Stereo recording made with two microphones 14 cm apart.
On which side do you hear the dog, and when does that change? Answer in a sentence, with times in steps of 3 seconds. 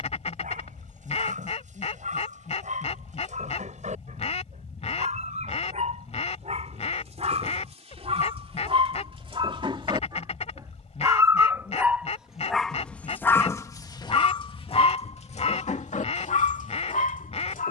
You can hear the dog on the right from 0 s and on the left from 12 s.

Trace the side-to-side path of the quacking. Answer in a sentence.
You can hear the quacking stay in one place.